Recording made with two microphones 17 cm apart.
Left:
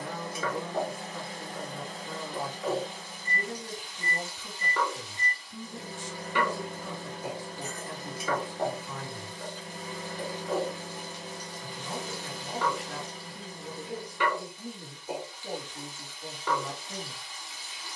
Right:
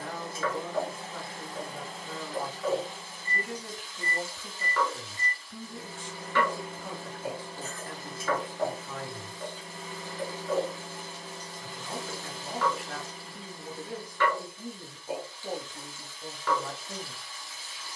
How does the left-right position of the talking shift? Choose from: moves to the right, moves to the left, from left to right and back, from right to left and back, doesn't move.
doesn't move.